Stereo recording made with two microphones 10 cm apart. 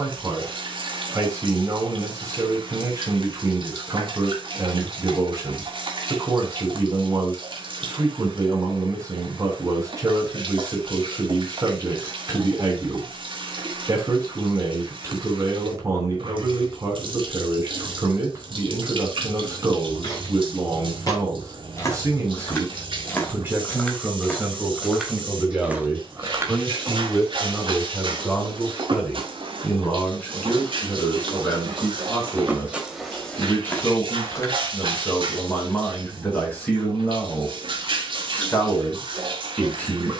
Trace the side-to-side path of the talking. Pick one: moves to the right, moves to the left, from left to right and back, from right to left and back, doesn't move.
moves to the left.